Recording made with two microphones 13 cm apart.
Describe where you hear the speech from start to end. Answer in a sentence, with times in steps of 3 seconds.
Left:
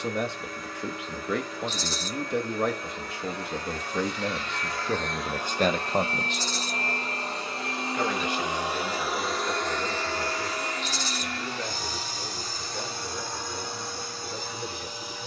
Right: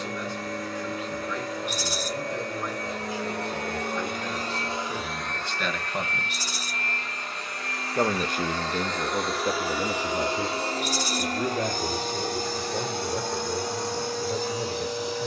In this clip you hear the speech on the left from 0 s and on the right from 6 s.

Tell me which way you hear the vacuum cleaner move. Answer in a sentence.
In this clip you hear the vacuum cleaner move from right to left and back again.